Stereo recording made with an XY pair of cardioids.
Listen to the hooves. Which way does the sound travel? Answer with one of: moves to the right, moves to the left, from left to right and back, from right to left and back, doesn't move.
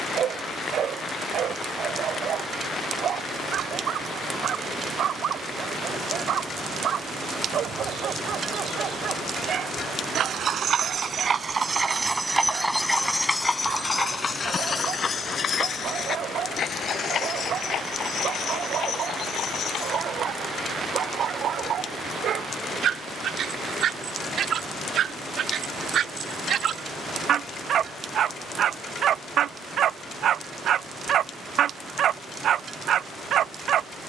moves to the left.